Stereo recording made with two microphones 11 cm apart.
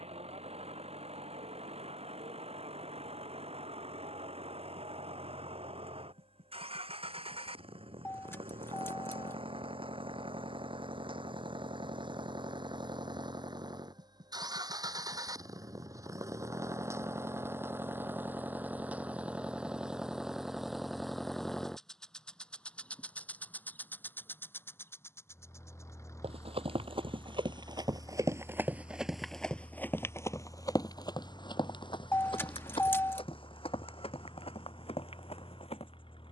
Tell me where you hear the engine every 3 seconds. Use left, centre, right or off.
right, right, right, right, right, right, centre, centre, left, left, left, left.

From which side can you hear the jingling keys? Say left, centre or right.
left.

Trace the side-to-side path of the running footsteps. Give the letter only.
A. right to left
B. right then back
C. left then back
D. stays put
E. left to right
A.